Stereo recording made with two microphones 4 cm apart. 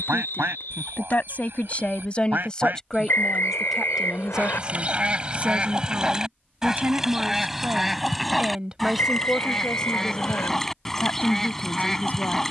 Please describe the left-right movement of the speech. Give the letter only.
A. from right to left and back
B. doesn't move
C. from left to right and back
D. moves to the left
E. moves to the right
C.